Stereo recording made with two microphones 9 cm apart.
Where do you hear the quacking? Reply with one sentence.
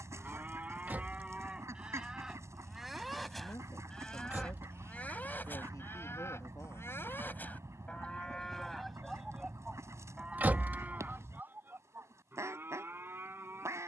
In this clip you hear the quacking on the right.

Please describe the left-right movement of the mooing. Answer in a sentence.
In this clip you hear the mooing move from right to left and back again.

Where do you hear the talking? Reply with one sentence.
In this clip you hear the talking on the left.